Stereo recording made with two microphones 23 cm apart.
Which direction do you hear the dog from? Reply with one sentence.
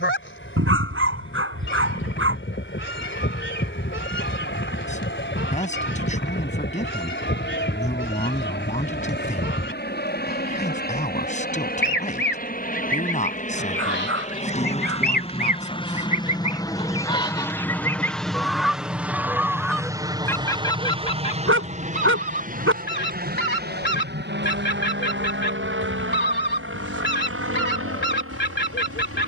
You can hear the dog on the right.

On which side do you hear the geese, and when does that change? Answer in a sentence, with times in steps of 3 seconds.
You can hear the geese on the left from 0 s, in the centre from 18 s and on the left from 21 s.